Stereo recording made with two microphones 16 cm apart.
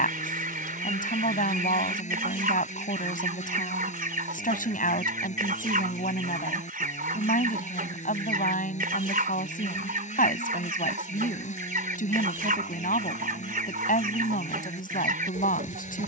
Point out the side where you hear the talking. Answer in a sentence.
You can hear the talking on the left.